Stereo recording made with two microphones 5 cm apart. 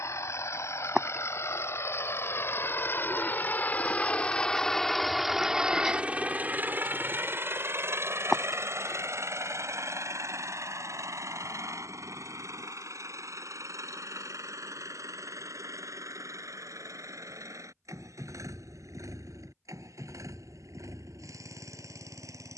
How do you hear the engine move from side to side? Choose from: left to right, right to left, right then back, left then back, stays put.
left to right.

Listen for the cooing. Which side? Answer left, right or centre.
centre.